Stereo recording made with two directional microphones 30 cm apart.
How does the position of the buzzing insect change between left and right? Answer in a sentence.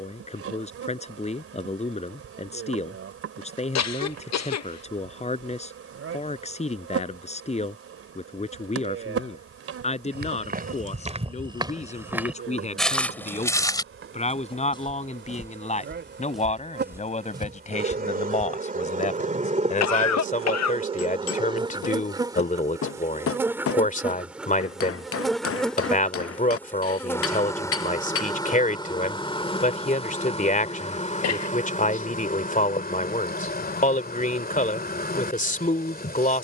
You can hear the buzzing insect move from right to left.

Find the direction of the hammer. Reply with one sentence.
You can hear the hammer on the left.